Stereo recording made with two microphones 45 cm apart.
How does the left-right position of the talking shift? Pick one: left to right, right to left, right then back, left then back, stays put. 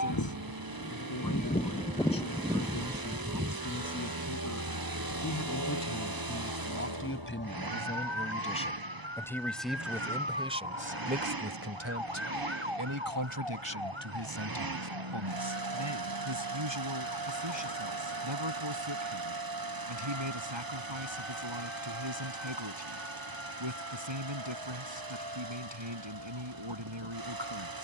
left to right.